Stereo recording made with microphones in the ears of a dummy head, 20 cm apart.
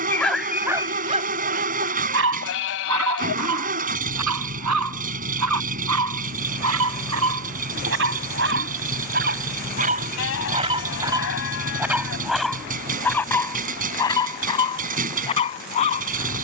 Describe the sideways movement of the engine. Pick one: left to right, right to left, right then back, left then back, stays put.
stays put.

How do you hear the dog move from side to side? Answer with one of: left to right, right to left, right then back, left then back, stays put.
right then back.